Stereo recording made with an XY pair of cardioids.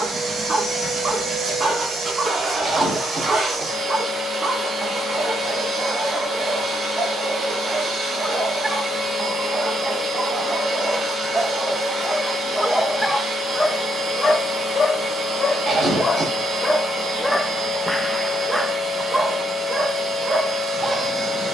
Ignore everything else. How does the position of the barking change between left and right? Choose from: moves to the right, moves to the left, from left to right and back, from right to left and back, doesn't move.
from right to left and back.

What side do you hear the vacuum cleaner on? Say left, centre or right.
right.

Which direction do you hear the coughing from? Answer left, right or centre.
right.